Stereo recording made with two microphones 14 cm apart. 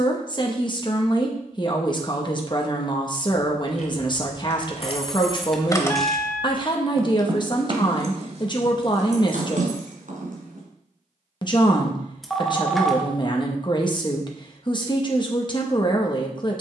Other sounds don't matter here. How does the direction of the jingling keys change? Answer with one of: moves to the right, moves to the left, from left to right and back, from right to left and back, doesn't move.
moves to the right.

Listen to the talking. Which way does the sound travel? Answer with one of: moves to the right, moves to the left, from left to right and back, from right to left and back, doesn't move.
doesn't move.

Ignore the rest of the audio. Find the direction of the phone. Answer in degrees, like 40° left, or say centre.
centre.